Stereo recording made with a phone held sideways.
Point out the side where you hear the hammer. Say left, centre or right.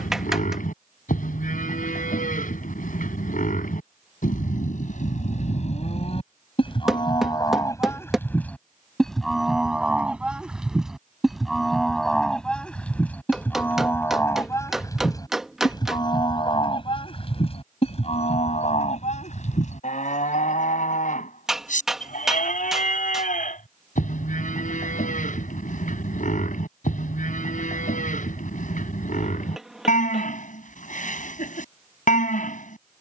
centre.